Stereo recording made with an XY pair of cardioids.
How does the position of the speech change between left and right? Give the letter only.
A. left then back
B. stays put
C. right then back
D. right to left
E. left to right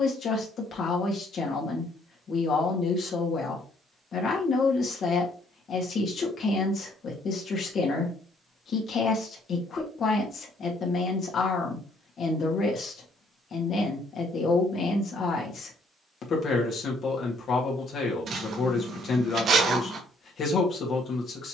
B.